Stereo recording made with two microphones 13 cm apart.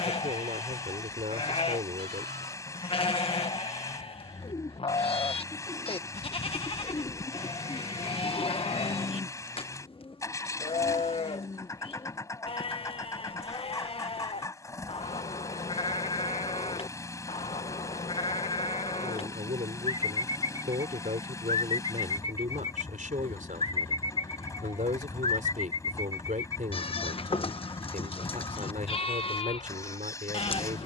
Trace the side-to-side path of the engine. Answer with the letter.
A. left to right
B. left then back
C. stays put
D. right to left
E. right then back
C.